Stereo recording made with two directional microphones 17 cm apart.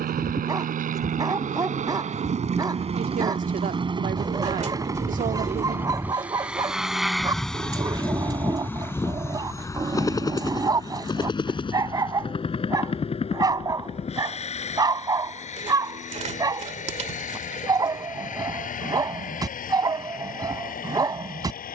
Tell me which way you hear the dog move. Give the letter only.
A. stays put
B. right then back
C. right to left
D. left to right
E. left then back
A.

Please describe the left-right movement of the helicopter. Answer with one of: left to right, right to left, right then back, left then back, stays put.
right to left.